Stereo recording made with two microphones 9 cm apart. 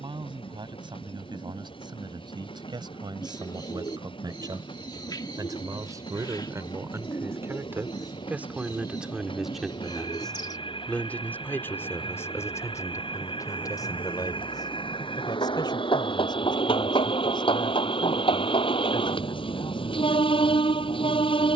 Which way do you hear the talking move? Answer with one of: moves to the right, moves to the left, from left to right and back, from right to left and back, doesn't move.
moves to the left.